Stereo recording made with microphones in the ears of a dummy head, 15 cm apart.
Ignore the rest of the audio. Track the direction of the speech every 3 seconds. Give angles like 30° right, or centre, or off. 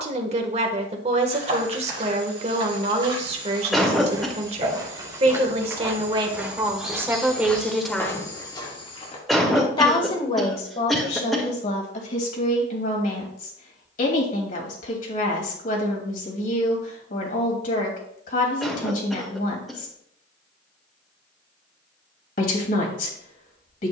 40° right, 40° right, 10° right, 40° left, 50° left, 50° left, 50° left, 50° left.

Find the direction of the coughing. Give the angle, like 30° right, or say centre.
centre.